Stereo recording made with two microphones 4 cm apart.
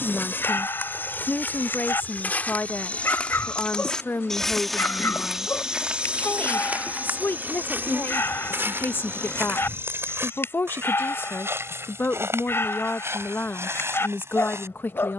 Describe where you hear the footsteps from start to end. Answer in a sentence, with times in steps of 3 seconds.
You can hear the footsteps on the left from 0 s, in the centre from 3 s and on the right from 6 s.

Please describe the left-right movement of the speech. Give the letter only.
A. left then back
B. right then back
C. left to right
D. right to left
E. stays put
E.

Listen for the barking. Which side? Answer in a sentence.
In this clip you hear the barking on the left.